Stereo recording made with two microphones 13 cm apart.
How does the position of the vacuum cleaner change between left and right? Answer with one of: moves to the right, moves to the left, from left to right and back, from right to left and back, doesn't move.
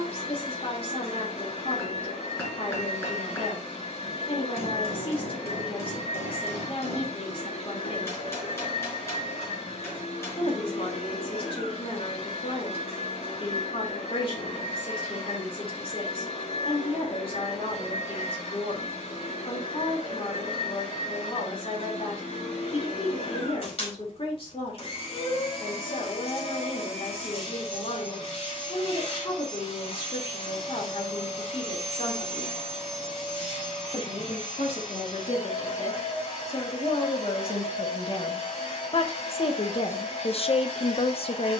doesn't move.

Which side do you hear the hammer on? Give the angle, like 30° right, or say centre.
20° left.